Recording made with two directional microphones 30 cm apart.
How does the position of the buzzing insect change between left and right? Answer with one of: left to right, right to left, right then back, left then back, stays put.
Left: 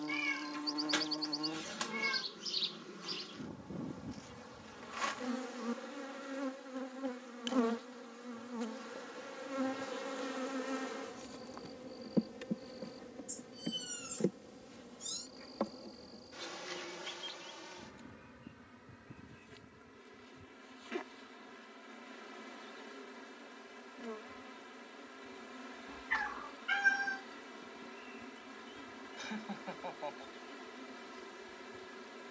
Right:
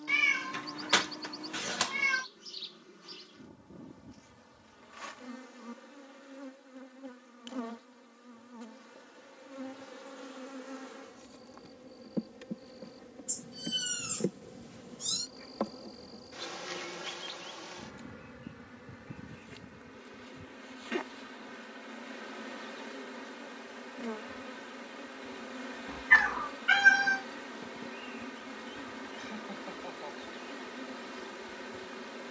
left to right.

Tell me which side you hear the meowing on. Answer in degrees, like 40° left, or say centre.
60° right.